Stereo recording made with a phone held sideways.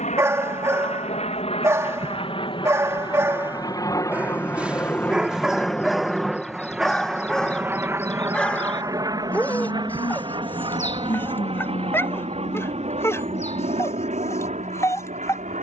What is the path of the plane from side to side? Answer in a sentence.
You can hear the plane move from left to right.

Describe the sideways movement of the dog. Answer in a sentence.
You can hear the dog move from right to left.